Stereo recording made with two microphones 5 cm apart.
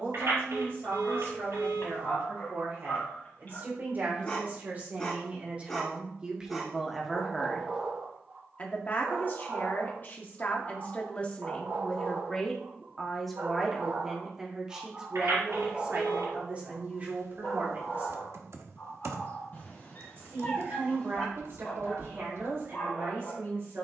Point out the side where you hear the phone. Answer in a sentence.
In this clip you hear the phone on the right.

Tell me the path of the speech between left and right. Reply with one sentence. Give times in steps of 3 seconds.
In this clip you hear the speech on the right from 0 s, in the centre from 6 s, on the left from 9 s, in the centre from 12 s and on the right from 15 s.